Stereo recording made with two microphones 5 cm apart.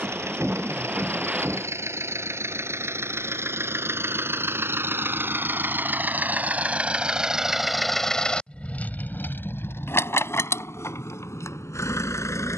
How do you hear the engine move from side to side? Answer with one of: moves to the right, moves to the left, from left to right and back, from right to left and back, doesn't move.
moves to the left.